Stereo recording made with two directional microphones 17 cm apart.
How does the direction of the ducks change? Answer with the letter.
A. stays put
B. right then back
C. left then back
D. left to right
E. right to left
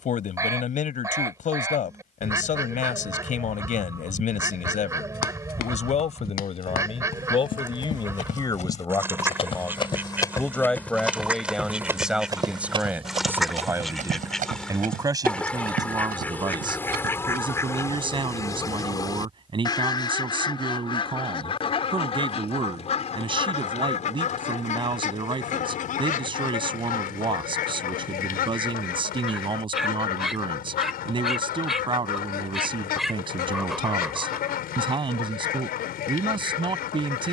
E.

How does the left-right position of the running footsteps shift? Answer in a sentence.
You can hear the running footsteps move to the right.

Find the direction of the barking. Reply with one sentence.
In this clip you hear the barking in the centre.